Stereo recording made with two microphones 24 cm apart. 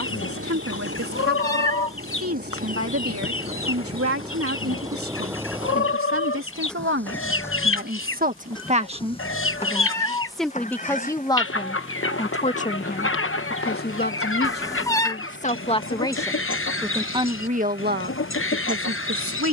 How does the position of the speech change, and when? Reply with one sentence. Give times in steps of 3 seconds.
You can hear the speech on the right from 0 s, in the centre from 9 s, on the left from 12 s, in the centre from 15 s and on the right from 18 s.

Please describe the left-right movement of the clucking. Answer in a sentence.
In this clip you hear the clucking stay in one place.